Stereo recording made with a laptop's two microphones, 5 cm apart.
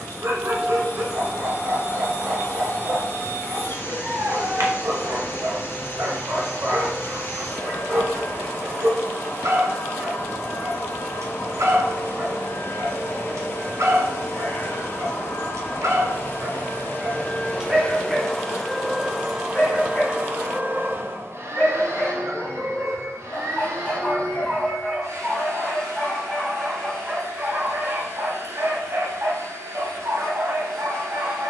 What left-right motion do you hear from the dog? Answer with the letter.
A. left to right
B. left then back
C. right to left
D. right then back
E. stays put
B.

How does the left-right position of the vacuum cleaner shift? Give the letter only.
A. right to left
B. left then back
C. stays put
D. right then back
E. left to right
E.